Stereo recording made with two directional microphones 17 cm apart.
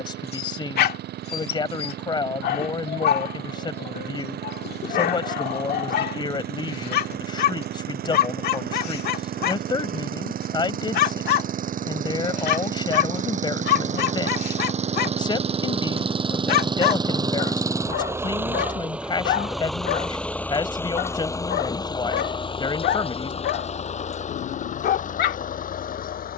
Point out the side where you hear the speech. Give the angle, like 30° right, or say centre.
20° left.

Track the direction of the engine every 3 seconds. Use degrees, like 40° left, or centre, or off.
70° right, 60° right, 60° right, 50° right, 40° right, 30° right, centre, 30° left, 50° left.